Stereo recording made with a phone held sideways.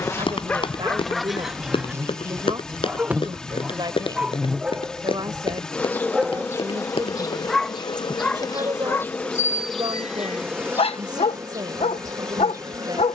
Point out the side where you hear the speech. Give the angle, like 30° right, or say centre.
30° right.